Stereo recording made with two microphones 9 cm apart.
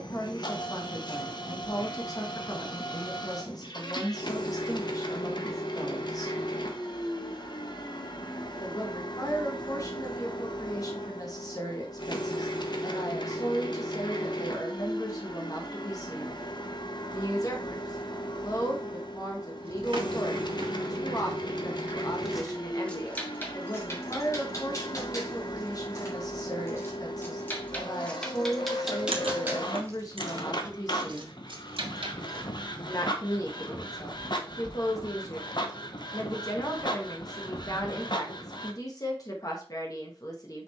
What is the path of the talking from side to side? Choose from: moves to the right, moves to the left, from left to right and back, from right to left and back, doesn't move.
doesn't move.